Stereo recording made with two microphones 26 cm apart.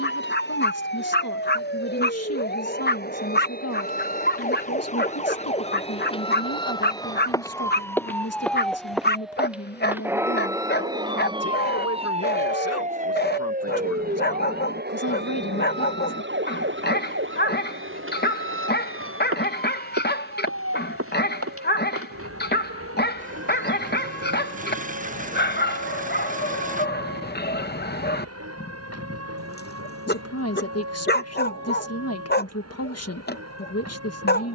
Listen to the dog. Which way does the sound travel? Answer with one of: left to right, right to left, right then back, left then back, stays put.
stays put.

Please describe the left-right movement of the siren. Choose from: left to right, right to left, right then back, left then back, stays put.
left to right.